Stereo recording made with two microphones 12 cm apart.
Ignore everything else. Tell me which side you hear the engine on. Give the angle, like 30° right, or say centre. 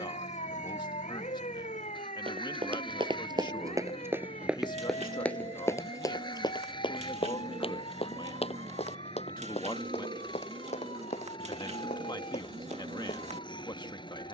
40° left.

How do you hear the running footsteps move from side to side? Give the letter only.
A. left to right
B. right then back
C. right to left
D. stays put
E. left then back
C.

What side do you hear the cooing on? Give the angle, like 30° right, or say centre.
70° right.